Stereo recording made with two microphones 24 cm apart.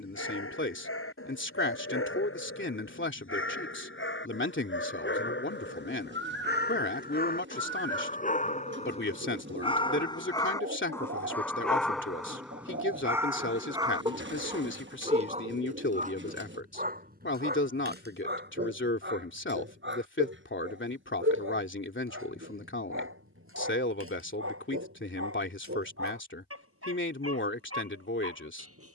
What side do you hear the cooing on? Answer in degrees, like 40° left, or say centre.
50° right.